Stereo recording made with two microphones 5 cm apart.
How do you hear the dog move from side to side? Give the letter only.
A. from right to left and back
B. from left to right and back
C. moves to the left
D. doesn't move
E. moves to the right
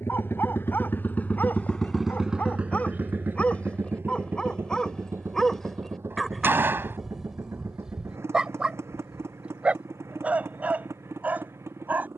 E.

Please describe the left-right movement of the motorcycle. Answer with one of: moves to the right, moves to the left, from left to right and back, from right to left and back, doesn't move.
moves to the right.